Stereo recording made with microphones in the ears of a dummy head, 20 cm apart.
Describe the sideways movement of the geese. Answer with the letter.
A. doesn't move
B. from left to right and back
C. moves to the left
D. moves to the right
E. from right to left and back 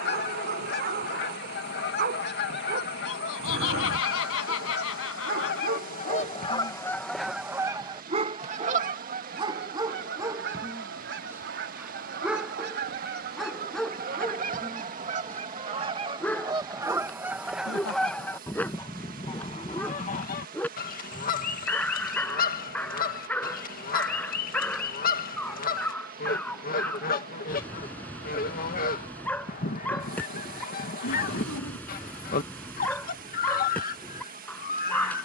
B.